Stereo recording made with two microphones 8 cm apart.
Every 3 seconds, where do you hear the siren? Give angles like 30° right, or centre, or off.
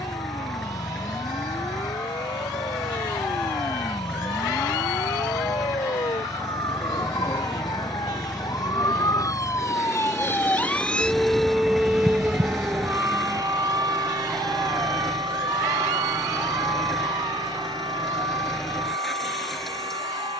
80° left, 70° left, 60° left, 20° left, 40° right, 70° right, 70° right.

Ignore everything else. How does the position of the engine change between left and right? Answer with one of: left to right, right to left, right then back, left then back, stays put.
stays put.